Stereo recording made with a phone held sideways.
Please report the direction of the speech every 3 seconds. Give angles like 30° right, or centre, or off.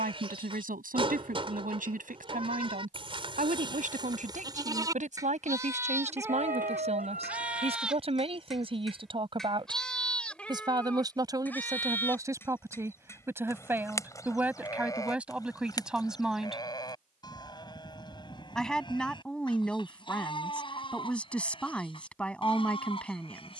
70° right, 60° right, 40° right, 30° right, 20° right, 10° right, 10° left, 10° left.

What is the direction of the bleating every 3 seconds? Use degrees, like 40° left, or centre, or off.
40° right, 30° right, 10° right, 10° left, 20° left, 30° left, 30° left, 40° left.